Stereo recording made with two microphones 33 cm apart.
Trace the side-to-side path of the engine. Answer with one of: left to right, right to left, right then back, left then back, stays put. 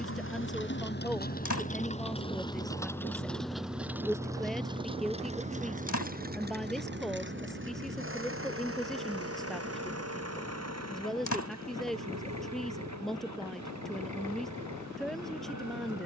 left to right.